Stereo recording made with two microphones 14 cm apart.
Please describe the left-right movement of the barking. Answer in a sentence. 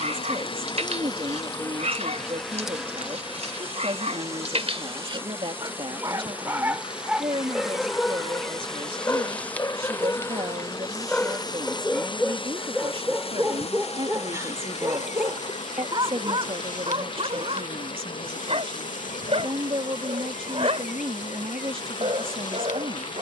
In this clip you hear the barking move from right to left and back again.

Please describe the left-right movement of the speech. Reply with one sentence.
You can hear the speech stay put.